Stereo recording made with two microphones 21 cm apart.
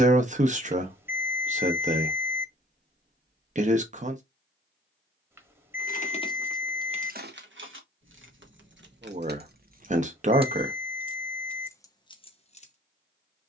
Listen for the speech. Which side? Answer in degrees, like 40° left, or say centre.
30° right.